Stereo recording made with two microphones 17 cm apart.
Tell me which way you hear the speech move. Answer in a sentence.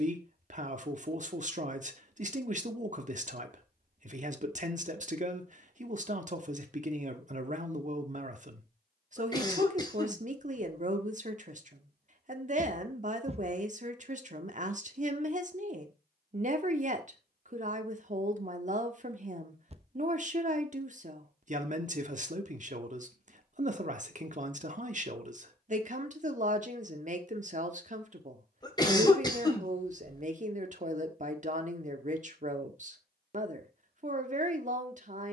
You can hear the speech stay in one place.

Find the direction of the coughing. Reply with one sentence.
In this clip you hear the coughing on the left.